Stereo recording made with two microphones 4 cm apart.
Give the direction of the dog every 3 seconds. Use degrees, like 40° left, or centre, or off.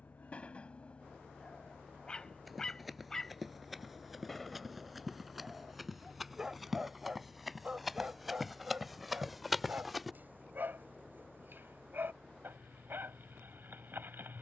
20° left, centre, 20° right, 50° right, 50° right.